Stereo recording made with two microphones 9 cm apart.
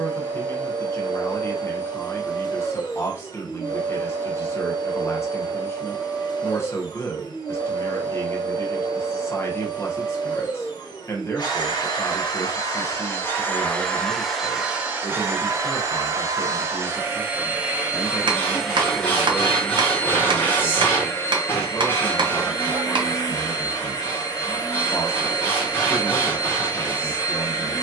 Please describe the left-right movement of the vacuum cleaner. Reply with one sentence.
In this clip you hear the vacuum cleaner go right and come back.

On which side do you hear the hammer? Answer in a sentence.
In this clip you hear the hammer on the right.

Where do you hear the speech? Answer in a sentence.
In this clip you hear the speech on the left.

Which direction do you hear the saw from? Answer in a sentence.
You can hear the saw on the left.